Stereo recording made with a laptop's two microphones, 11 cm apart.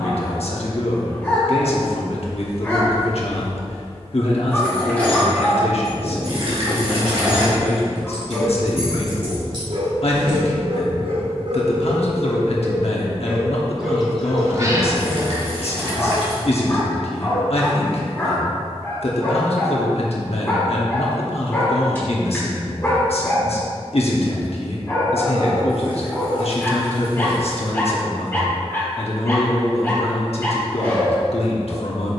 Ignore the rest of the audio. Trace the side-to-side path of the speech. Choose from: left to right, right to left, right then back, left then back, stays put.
stays put.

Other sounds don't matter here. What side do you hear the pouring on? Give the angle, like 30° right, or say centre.
60° right.